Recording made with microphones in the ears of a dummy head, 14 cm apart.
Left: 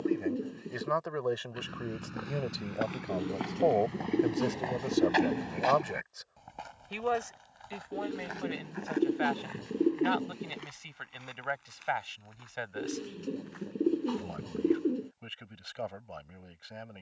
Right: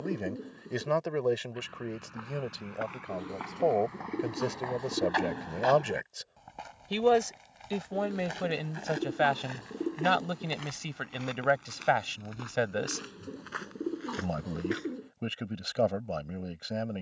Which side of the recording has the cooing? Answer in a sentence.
In this clip you hear the cooing on the left.